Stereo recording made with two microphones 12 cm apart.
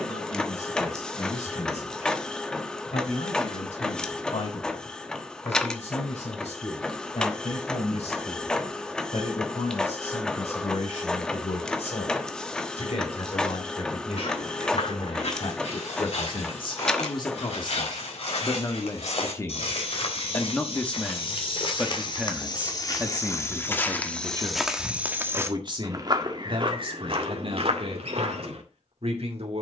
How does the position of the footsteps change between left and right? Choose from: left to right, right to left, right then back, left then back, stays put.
left to right.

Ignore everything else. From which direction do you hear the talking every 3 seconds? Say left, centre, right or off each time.
left, left, left, left, left, left, left, centre, right, right.